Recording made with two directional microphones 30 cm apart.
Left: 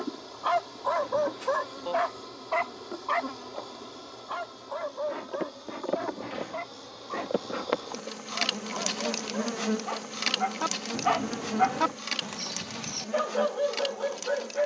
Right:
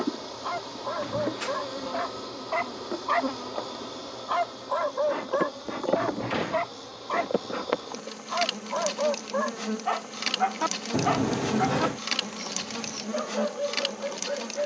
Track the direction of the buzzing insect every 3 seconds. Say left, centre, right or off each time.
right, right, centre, centre, right.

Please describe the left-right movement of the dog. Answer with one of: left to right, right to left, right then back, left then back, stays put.
right then back.